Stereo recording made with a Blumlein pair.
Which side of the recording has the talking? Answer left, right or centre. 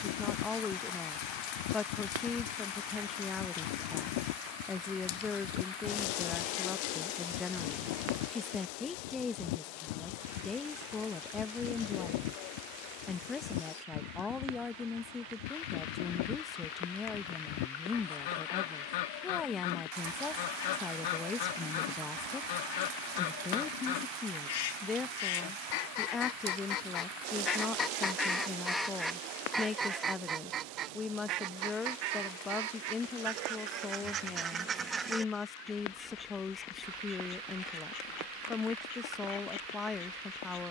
centre.